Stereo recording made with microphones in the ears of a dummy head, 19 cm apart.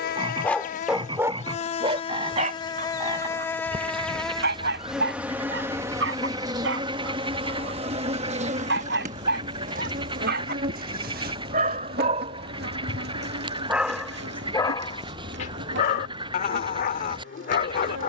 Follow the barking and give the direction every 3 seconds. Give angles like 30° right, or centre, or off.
20° right, 50° right, 60° right, 50° right, 10° right, 40° left.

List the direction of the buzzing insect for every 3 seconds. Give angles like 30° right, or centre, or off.
30° left, centre, 30° right, 40° right, 50° right, 60° right.